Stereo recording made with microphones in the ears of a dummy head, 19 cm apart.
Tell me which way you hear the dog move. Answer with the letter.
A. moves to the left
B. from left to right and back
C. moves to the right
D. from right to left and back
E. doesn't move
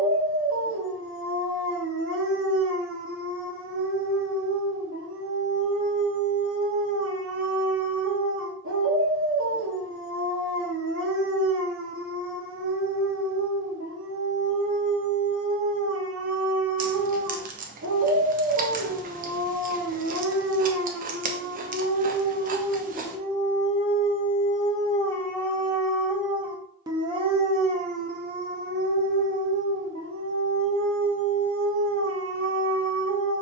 D.